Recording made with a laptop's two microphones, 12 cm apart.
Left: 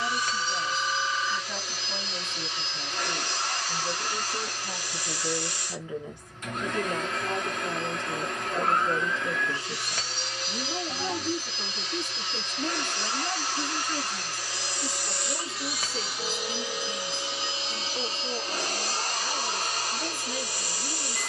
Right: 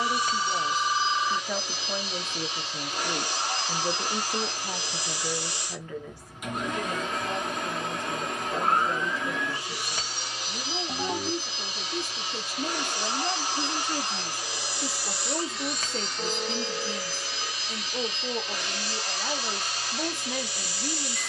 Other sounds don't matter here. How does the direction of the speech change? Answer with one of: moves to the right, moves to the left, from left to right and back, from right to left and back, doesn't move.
from right to left and back.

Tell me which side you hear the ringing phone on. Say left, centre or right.
right.